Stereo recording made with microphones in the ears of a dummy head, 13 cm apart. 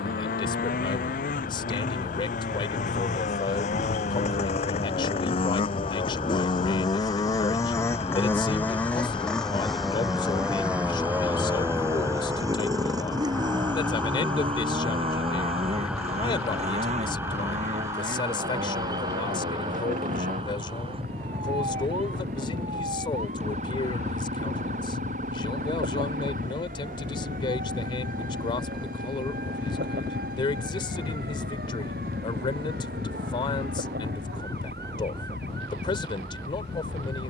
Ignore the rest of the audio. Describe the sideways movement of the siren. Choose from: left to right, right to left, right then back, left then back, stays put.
left to right.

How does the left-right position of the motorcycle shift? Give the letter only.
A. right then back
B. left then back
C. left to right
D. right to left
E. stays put
C.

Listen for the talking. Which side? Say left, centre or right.
left.